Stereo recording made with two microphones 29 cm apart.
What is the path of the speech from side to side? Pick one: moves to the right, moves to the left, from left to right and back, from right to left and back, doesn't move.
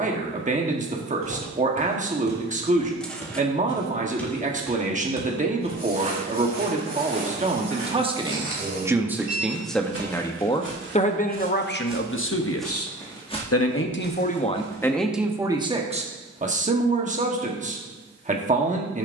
from right to left and back.